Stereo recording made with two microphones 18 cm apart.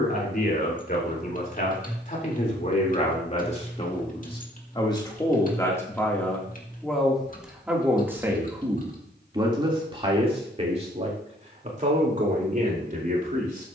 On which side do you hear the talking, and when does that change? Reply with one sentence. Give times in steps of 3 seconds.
In this clip you hear the talking on the left from 0 s, in the centre from 6 s and on the right from 9 s.